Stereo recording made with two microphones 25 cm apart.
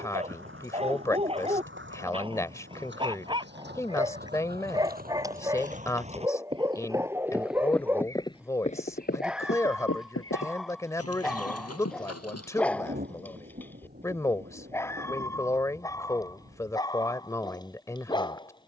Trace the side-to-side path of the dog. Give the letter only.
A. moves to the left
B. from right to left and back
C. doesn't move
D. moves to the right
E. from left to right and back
A.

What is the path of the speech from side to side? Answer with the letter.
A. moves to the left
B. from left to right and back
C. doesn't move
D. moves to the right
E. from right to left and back
C.